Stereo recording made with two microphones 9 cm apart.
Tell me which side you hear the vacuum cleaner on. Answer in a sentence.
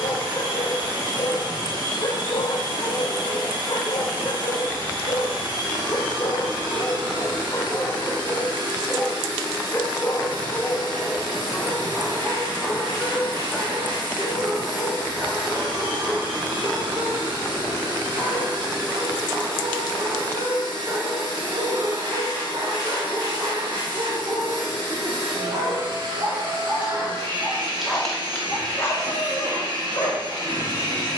In this clip you hear the vacuum cleaner on the right.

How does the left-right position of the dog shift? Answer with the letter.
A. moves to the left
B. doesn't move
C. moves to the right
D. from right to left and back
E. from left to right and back
E.